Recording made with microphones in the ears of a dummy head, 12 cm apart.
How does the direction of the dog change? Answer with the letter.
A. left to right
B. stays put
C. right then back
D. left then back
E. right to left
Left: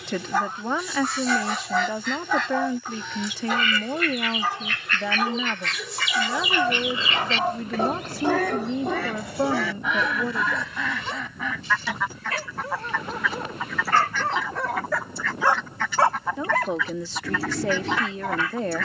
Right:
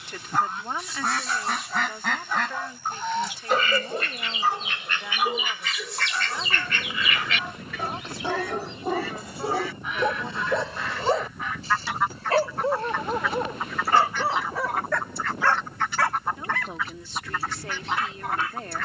C.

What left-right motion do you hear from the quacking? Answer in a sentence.
You can hear the quacking travel towards the left.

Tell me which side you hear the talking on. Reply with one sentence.
In this clip you hear the talking on the left.